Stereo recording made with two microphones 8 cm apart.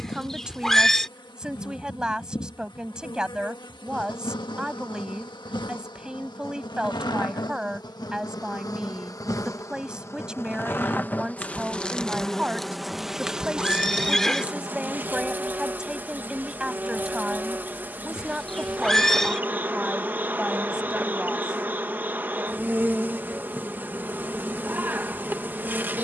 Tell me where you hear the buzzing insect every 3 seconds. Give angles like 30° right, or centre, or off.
60° left, 60° left, 50° left, 30° left, 10° right, 20° right, 20° right, 20° right, 20° right.